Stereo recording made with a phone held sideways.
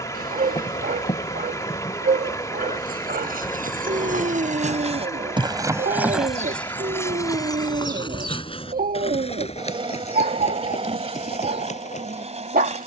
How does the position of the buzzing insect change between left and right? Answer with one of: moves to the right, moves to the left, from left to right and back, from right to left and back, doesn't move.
moves to the right.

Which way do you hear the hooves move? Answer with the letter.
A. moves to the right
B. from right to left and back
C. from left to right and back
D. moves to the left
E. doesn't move
D.